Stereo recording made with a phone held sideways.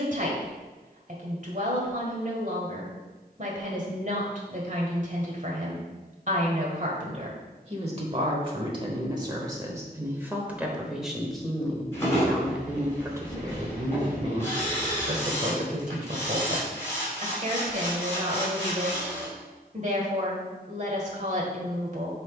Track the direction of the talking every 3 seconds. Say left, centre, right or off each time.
right, right, right, centre, right, right, right, right.